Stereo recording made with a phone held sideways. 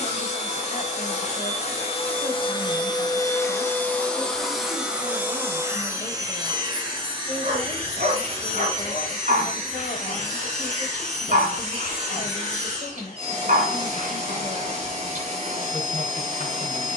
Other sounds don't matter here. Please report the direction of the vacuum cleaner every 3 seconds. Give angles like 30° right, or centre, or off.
40° left, centre, 30° right, 50° right, 50° right, 50° right.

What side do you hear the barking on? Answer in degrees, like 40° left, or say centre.
60° right.